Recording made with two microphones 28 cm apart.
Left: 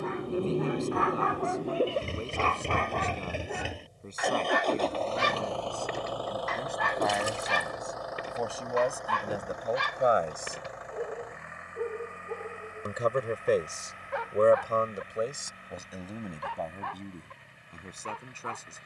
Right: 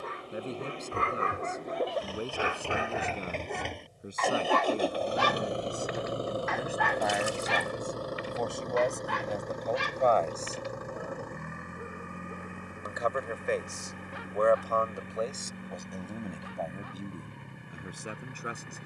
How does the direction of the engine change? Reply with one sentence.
In this clip you hear the engine go from the left side to the right.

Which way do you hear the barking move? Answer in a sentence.
In this clip you hear the barking go from the right side to the left.